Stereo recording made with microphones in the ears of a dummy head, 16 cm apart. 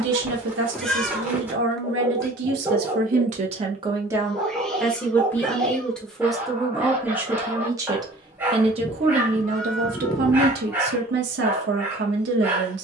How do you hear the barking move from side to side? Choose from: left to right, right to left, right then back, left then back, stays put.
stays put.